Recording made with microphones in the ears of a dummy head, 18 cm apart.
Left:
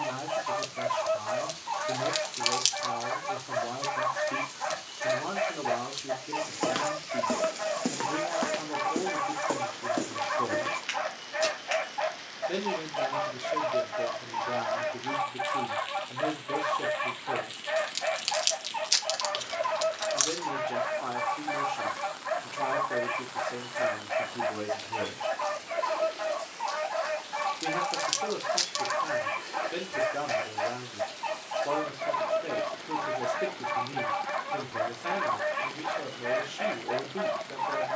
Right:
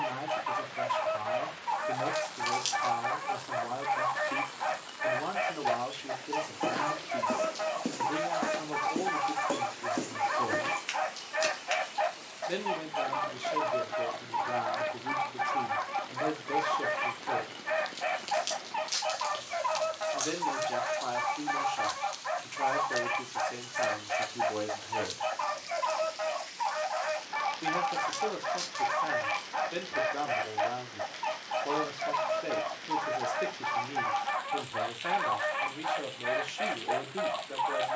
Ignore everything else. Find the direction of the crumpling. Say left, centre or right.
left.